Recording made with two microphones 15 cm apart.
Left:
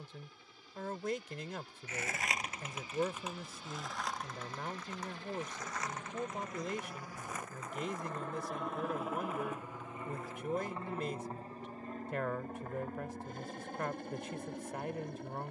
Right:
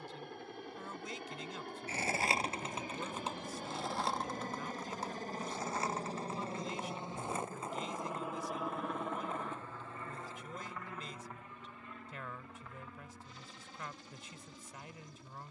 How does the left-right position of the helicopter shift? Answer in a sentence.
You can hear the helicopter travel towards the left.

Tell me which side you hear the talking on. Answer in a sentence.
You can hear the talking on the left.